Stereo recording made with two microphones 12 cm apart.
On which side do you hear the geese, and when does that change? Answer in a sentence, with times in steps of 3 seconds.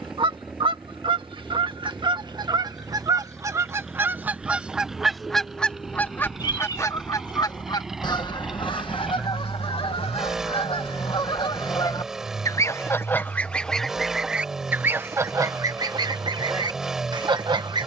You can hear the geese on the right from 0 s, in the centre from 3 s, on the left from 6 s, in the centre from 12 s and on the right from 15 s.